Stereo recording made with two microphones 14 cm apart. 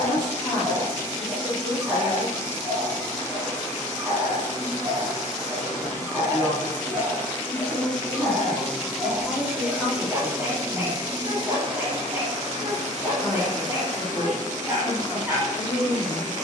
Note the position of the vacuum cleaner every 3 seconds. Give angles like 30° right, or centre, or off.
20° left, 20° left, 10° left, 20° right, 60° right, 60° right.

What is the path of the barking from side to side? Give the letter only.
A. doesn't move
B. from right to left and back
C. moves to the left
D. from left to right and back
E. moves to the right
A.